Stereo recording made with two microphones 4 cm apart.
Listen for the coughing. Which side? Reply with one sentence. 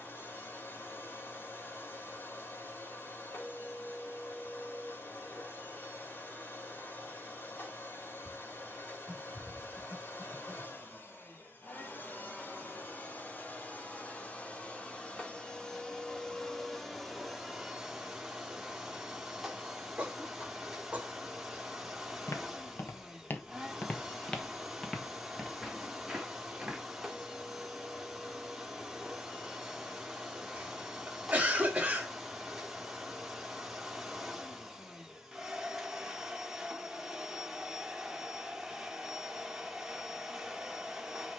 In this clip you hear the coughing on the right.